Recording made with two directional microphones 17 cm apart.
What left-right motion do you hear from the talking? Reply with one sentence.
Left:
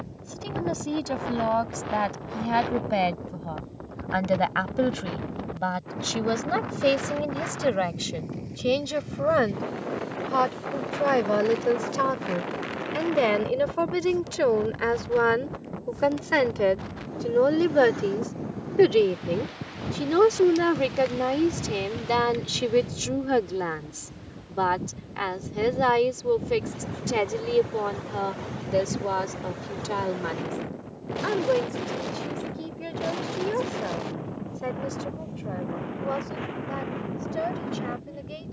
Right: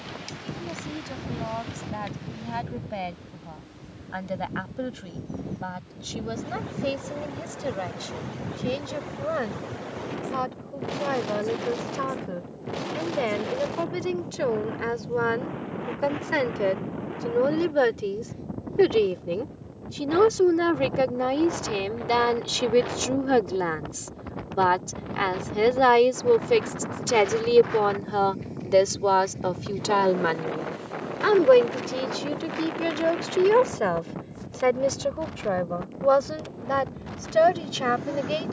You can hear the talking move from left to right.